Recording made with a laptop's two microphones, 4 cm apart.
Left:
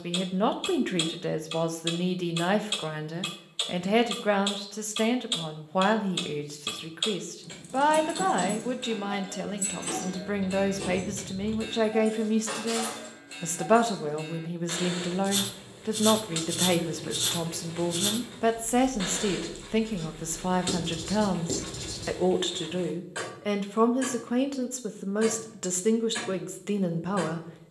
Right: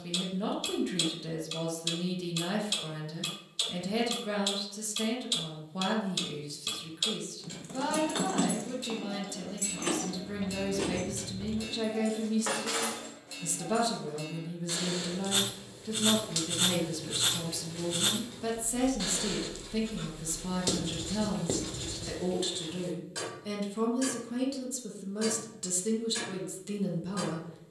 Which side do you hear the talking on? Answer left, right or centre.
left.